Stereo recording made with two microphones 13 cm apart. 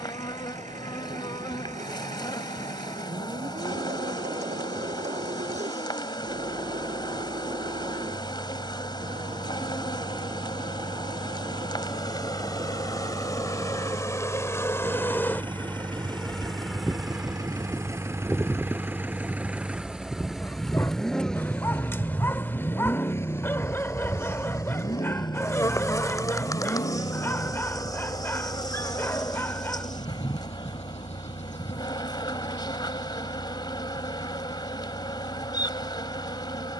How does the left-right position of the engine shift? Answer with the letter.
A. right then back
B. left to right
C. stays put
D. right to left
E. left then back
D.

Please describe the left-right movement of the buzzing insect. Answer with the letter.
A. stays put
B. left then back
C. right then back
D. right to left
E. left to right
C.